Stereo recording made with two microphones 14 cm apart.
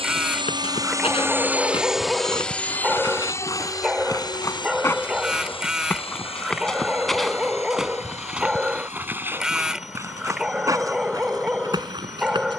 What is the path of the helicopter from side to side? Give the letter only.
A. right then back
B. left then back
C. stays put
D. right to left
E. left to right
D.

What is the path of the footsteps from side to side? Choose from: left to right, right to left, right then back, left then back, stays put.
left to right.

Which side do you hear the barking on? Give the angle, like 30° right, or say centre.
10° right.